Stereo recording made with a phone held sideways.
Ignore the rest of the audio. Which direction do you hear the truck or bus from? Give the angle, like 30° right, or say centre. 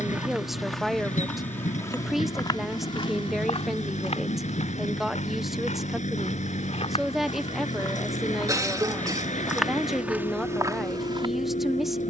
50° left.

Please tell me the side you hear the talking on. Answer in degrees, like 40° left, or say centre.
centre.